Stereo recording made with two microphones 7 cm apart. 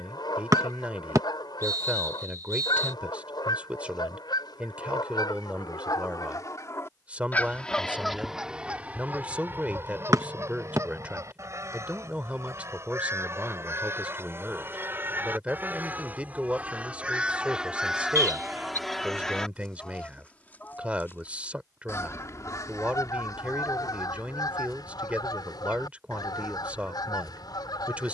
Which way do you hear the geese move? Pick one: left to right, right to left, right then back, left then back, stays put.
right then back.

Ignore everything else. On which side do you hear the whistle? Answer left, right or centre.
right.